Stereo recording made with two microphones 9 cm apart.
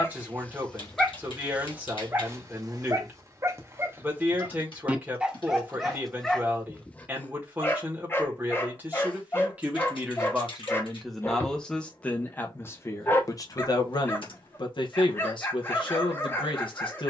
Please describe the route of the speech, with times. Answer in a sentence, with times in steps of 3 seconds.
You can hear the speech on the right from 0 s, in the centre from 9 s and on the left from 12 s.